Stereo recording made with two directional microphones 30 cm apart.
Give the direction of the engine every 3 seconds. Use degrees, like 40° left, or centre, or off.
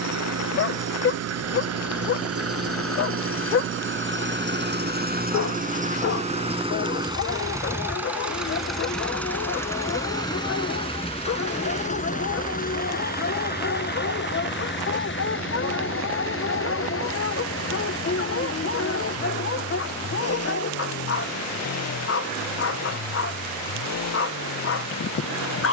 50° right, 40° right, 10° right, 10° left, 30° left, 40° left, 50° left, 60° left, 60° left.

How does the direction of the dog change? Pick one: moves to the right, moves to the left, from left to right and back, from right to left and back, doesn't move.
doesn't move.